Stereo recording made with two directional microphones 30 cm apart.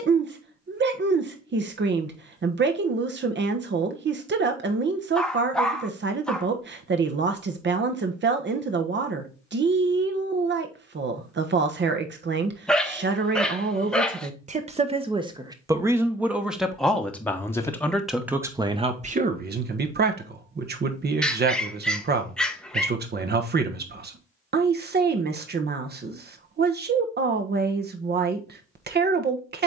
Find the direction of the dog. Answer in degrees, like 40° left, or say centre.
centre.